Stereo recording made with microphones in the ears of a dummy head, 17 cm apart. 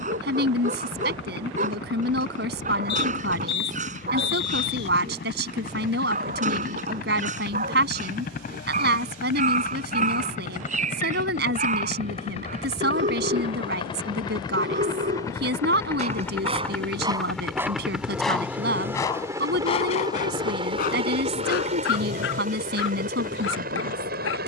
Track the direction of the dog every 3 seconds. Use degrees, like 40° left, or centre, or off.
40° right, 40° right, 40° right, 40° right, 40° right, 30° right, 30° left, 60° left.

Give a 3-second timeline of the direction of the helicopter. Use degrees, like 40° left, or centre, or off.
60° left, 50° left, 50° left, 40° left, 30° left, 10° left, 20° right, 40° right.